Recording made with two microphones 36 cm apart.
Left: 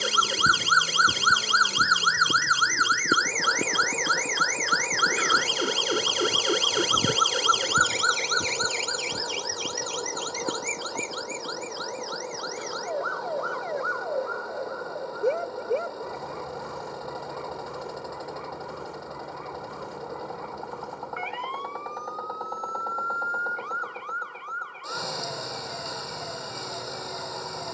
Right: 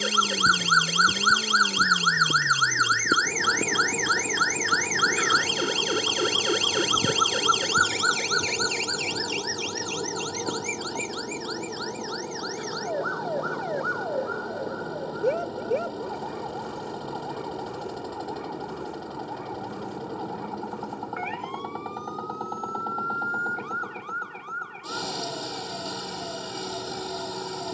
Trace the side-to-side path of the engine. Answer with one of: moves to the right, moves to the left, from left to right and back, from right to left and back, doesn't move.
doesn't move.